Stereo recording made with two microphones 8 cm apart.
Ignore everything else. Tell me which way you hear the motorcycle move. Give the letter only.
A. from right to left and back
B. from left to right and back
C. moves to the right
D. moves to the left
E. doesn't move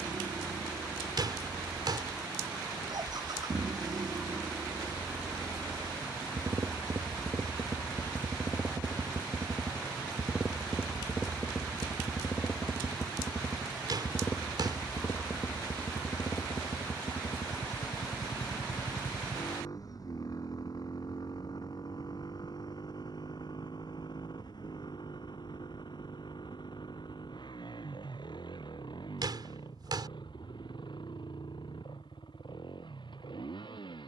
D.